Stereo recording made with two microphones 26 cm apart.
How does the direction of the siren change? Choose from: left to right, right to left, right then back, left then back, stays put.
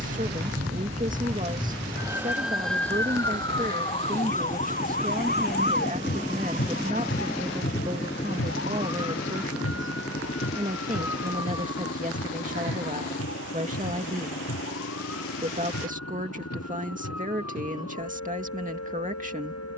right to left.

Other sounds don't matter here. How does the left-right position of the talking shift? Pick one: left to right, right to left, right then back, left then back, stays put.
stays put.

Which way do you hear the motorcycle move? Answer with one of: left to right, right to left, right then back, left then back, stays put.
right to left.